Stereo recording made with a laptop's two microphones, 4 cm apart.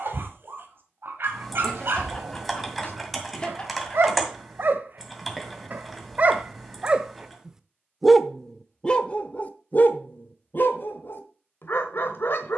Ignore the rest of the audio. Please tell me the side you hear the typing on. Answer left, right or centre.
centre.